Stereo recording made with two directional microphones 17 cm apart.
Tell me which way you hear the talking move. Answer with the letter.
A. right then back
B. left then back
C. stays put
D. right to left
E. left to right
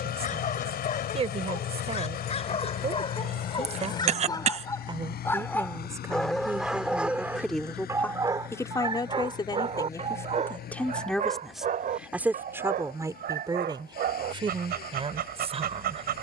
B.